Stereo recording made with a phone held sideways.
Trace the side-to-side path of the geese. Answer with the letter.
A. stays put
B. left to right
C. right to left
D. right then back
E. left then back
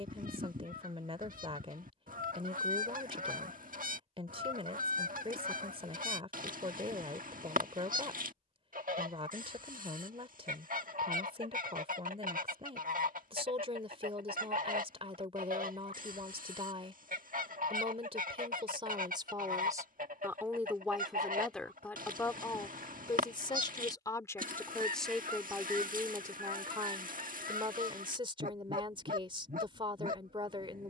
A.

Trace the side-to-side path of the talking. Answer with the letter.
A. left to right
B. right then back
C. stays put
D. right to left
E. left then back
E.